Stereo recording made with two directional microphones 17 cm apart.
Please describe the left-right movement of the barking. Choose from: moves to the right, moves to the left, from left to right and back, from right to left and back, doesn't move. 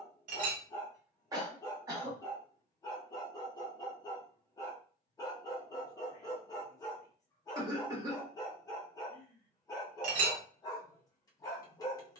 doesn't move.